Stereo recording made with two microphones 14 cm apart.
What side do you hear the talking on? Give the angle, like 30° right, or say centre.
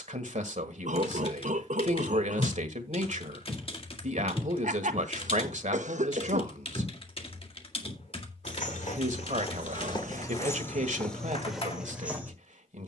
60° right.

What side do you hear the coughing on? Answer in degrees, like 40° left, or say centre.
60° right.